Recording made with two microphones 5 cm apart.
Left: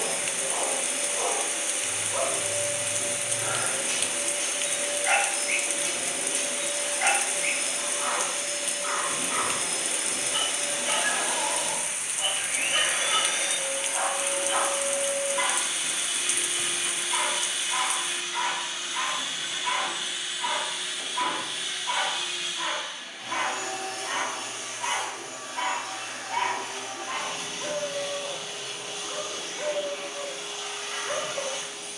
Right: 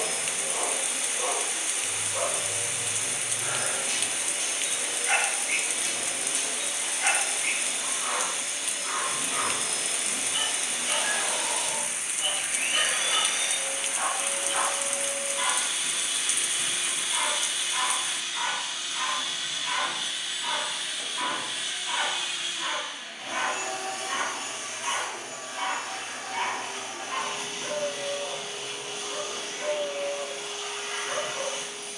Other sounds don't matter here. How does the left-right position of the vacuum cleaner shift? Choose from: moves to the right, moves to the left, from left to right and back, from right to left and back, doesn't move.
moves to the right.